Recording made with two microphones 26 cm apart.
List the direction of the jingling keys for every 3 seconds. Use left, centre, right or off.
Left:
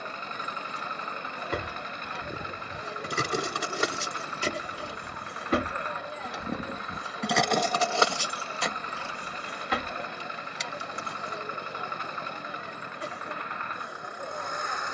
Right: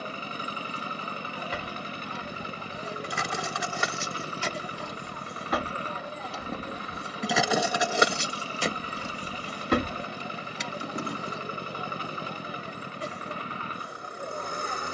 left, left, centre, right, off.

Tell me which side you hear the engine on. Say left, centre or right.
right.